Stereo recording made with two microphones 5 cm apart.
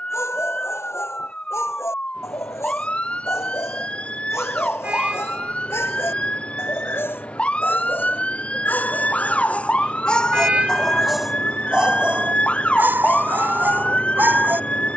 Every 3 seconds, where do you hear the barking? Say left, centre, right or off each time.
left, left, left, centre, right.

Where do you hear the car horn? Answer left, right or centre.
right.